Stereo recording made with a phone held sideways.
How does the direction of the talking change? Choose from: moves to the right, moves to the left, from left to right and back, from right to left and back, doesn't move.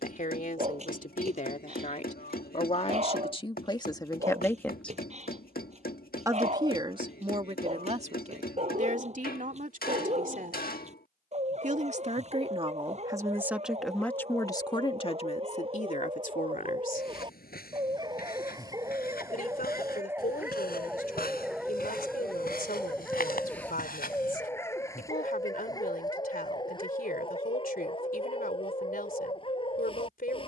from left to right and back.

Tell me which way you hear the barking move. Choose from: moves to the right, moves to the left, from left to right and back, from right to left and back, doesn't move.
moves to the left.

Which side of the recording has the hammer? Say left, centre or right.
left.